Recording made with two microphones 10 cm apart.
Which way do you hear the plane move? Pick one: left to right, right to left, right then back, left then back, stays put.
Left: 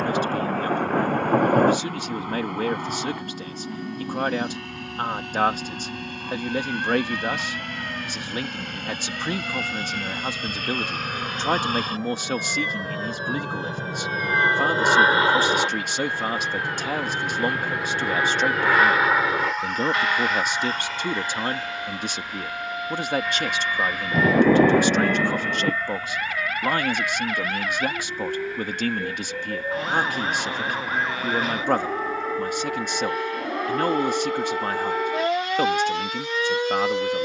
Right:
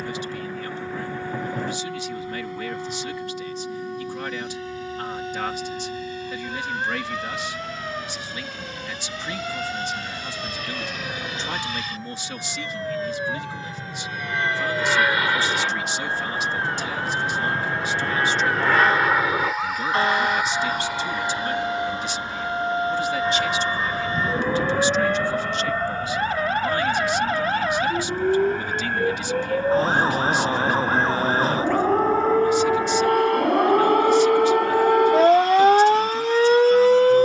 left to right.